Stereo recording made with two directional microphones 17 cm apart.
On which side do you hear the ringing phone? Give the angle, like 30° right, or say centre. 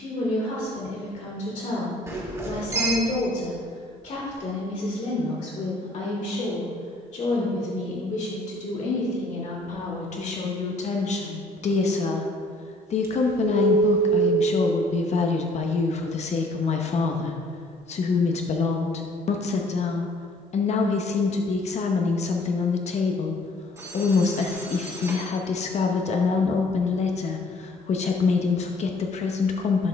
20° right.